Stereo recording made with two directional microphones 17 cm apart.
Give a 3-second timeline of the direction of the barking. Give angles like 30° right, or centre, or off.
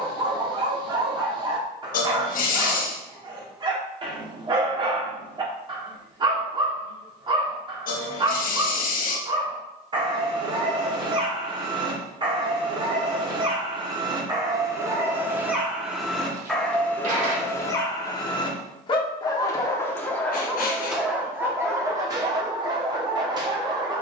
30° right, 30° right, 30° right, 30° right, 30° right, centre, 10° left, 20° right.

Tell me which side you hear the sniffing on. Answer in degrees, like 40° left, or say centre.
60° left.